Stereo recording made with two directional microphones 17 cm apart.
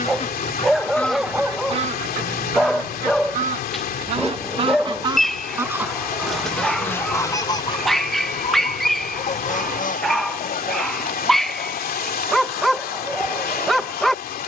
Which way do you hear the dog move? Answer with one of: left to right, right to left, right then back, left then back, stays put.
stays put.